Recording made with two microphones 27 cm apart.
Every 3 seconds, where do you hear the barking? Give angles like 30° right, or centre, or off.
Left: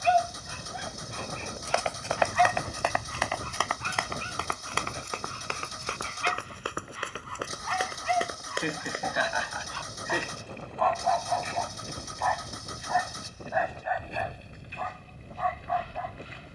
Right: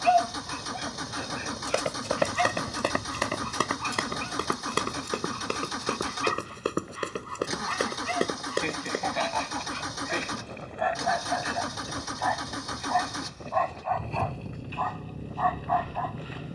10° right, 60° right, 40° right, 20° right, 10° left, 30° left.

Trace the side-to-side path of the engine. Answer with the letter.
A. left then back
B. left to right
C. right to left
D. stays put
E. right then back
D.